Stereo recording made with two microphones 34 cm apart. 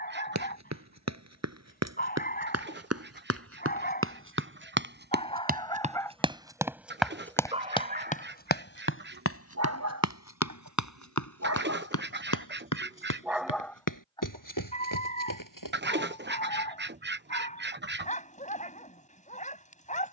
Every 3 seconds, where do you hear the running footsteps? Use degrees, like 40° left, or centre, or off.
60° right, 40° right, 10° left, 60° left, 80° left, 80° left, off.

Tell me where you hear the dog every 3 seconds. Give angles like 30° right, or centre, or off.
30° left, 20° left, 20° right, 60° right, centre, 20° left, 20° left.